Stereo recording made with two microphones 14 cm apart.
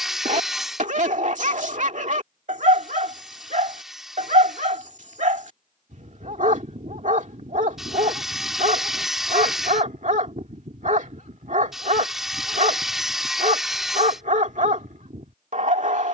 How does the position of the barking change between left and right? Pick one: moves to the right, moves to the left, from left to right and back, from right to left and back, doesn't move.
doesn't move.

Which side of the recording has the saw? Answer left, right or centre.
centre.